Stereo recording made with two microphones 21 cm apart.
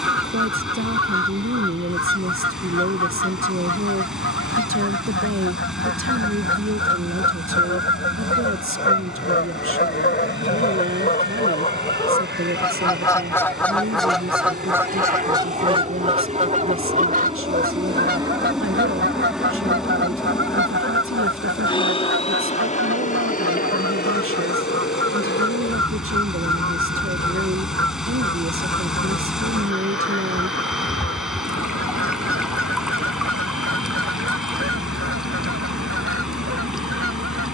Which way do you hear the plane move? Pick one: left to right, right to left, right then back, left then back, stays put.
right to left.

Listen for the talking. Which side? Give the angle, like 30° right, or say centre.
70° right.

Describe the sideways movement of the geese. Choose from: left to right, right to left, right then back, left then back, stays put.
left to right.